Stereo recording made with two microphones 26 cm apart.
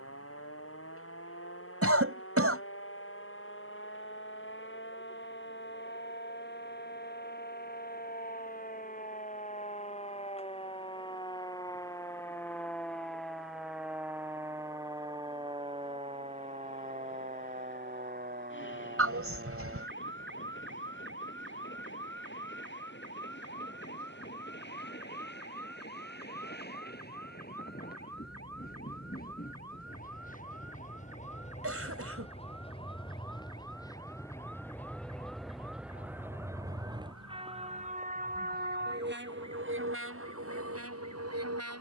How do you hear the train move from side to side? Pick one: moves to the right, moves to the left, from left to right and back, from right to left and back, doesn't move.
moves to the right.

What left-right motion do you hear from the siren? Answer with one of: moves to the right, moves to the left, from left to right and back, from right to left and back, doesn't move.
moves to the right.